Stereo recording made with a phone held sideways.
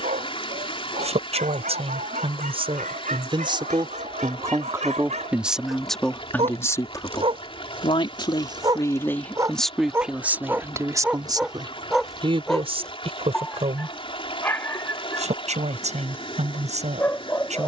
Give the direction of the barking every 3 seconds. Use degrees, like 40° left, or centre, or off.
70° right, 60° right, 40° right, 10° right, 10° left, 20° left.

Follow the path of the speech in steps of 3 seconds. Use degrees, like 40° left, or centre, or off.
50° right, 20° right, 30° left, 10° right, 50° right, 60° right.